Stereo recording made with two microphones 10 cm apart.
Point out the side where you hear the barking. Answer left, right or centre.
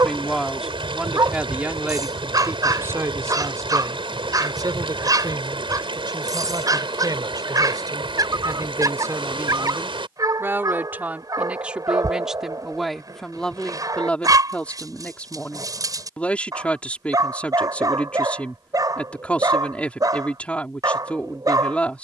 right.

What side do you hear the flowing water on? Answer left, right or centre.
right.